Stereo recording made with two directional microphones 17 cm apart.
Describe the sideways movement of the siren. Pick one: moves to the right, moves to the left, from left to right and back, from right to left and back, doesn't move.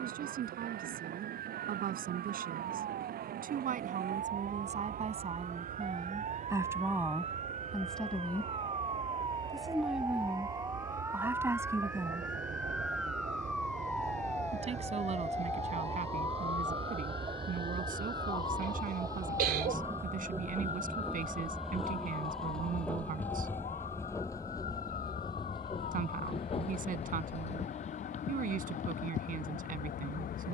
moves to the left.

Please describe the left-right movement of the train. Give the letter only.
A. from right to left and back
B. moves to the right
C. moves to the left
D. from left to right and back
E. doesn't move
C.